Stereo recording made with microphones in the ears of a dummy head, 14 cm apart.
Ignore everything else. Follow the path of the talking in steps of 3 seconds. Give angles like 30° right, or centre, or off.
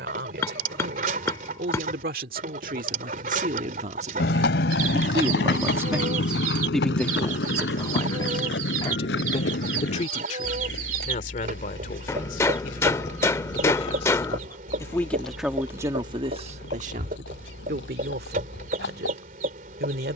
70° right, 40° right, 20° left, 50° left, 40° left, 30° right, 70° right.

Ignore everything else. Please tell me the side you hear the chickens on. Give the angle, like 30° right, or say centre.
50° right.